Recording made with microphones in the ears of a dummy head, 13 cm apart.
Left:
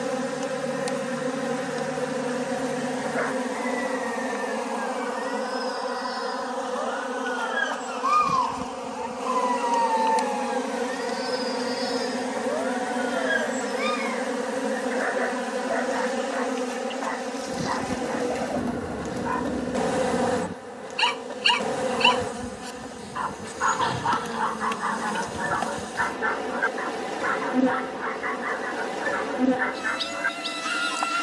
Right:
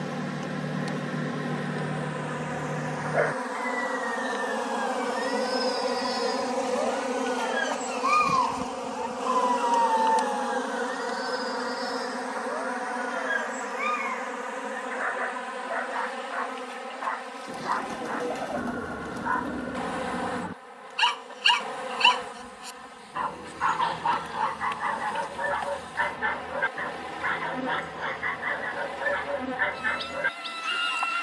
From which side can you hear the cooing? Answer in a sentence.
You can hear the cooing in the centre.